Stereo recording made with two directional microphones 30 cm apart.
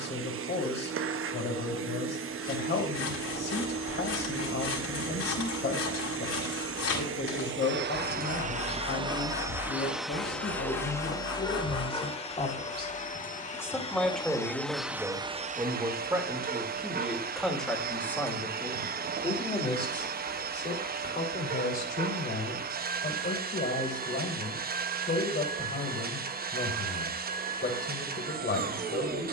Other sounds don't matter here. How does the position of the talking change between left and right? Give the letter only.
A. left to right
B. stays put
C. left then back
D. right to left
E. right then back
E.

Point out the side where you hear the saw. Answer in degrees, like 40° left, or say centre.
50° left.